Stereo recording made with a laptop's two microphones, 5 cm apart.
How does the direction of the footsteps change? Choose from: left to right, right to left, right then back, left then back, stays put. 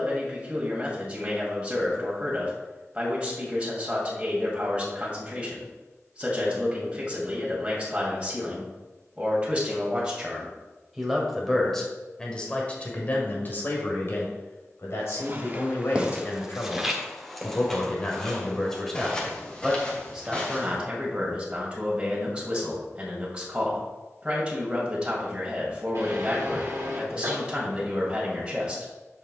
right to left.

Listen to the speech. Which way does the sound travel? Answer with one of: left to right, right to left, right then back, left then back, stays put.
left then back.